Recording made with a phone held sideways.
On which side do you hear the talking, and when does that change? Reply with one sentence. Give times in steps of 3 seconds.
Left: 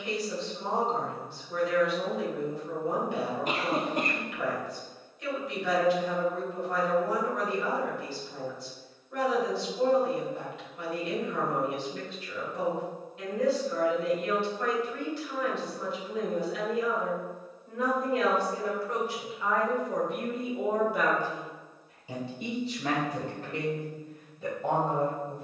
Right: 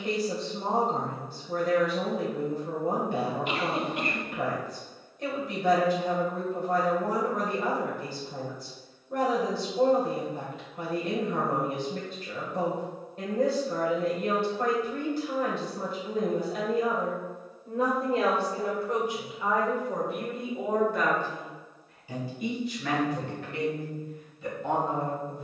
You can hear the talking on the right from 0 s, in the centre from 18 s and on the left from 21 s.